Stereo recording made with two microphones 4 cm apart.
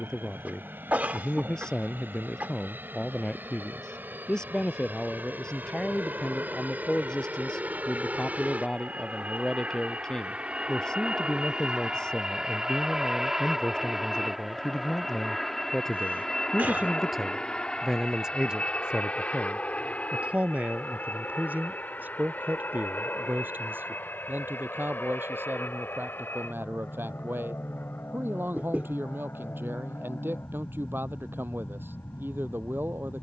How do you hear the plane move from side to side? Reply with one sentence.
In this clip you hear the plane travel towards the left.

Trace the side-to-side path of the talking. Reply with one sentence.
You can hear the talking move from left to right.